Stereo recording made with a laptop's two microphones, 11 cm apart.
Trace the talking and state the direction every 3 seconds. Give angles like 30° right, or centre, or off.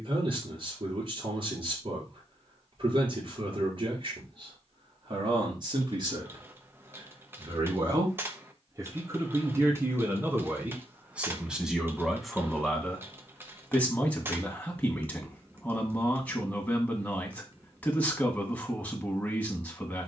50° right, 50° right, 40° right, 20° right, 10° left, 10° left, 10° left.